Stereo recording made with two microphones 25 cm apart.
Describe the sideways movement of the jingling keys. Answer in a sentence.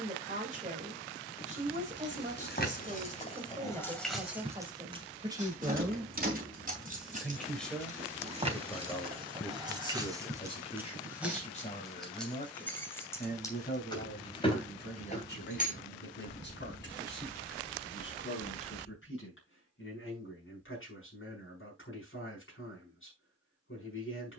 You can hear the jingling keys move from left to right and back again.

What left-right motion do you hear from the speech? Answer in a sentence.
You can hear the speech go from the right side to the left.